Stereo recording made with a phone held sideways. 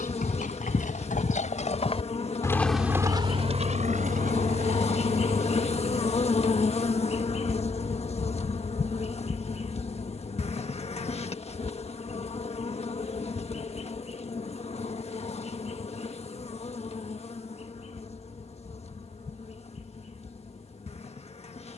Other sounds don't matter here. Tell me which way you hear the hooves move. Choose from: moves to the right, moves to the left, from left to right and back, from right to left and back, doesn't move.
moves to the right.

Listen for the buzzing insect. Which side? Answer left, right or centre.
left.